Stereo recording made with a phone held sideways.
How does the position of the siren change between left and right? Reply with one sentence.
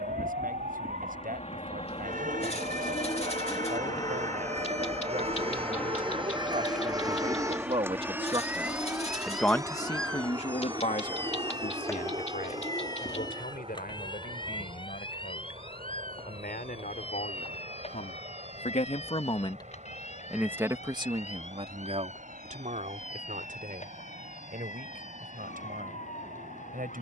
In this clip you hear the siren move from right to left.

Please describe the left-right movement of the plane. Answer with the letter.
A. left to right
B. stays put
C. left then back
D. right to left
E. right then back
A.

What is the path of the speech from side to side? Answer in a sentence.
In this clip you hear the speech go left and come back.